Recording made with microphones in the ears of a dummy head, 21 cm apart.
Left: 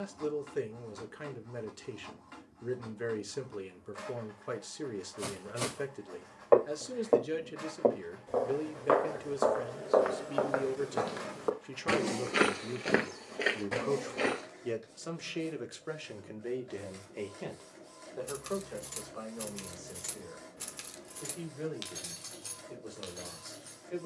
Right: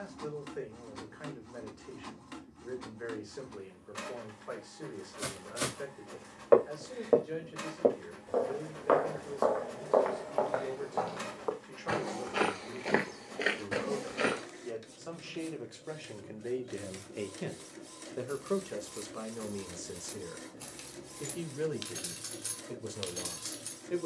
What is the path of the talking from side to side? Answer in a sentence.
In this clip you hear the talking move from left to right.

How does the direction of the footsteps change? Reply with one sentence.
In this clip you hear the footsteps move from right to left and back again.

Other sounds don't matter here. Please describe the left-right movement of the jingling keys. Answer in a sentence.
In this clip you hear the jingling keys travel towards the right.